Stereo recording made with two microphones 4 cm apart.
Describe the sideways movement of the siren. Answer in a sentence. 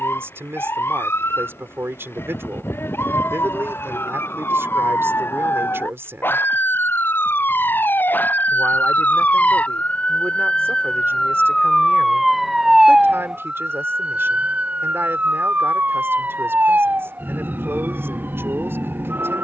In this clip you hear the siren travel towards the right.